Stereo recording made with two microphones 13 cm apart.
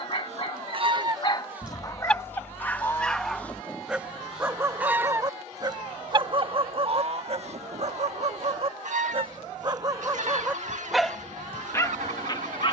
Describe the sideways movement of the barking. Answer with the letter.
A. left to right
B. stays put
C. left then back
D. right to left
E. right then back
E.